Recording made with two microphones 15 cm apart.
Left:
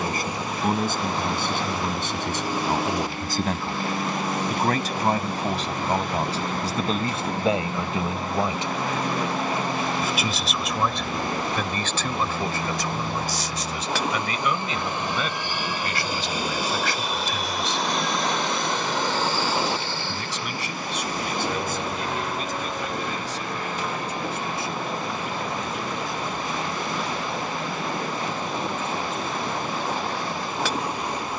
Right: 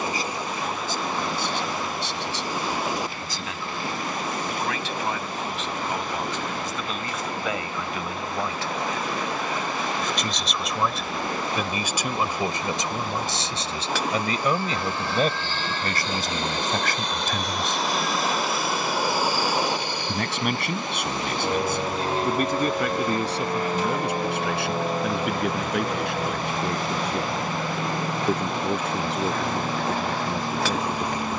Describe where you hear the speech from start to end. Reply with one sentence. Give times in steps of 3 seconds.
You can hear the speech on the left from 0 s, in the centre from 9 s, on the right from 12 s and not at all from 30 s.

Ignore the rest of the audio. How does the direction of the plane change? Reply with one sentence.
You can hear the plane go from the left side to the right.